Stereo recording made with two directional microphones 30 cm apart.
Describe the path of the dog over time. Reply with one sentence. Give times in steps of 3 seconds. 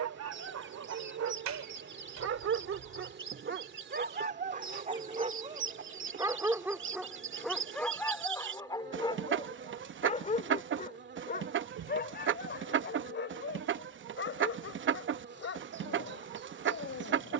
You can hear the dog on the right from 0 s, in the centre from 6 s and on the left from 9 s.